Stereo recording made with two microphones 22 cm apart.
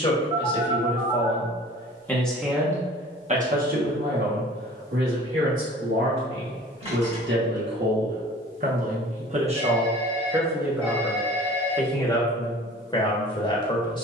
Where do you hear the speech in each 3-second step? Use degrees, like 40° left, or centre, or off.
10° left, 60° right, 60° right, 10° right, 20° left.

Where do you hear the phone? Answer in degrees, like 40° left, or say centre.
30° right.